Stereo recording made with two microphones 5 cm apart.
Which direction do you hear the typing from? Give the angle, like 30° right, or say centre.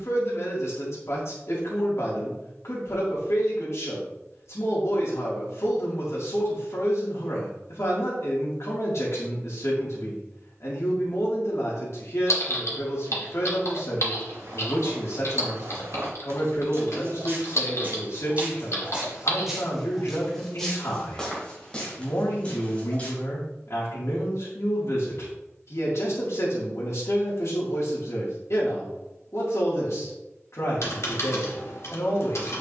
70° left.